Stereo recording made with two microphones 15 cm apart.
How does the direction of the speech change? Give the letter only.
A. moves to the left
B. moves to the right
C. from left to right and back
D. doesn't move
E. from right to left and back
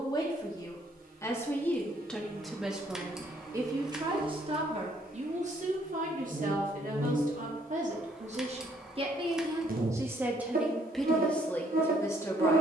C.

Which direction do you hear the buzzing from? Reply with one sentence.
You can hear the buzzing on the right.